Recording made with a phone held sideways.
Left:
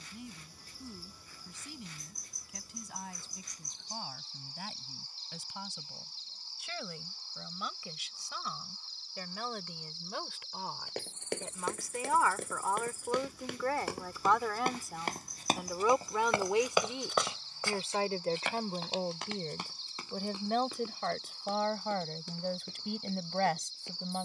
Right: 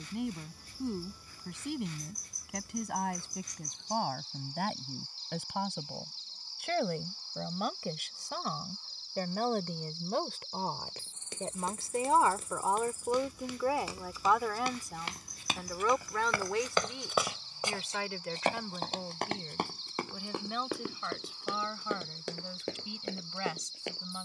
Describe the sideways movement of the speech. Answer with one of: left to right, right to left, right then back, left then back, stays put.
right to left.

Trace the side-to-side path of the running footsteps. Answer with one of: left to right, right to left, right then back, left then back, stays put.
left to right.